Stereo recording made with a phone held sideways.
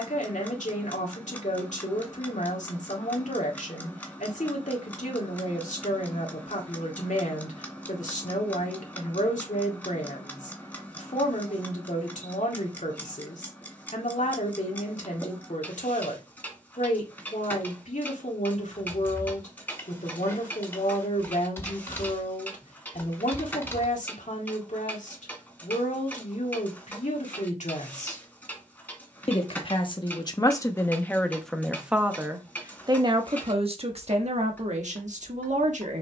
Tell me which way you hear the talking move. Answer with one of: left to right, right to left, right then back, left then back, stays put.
left to right.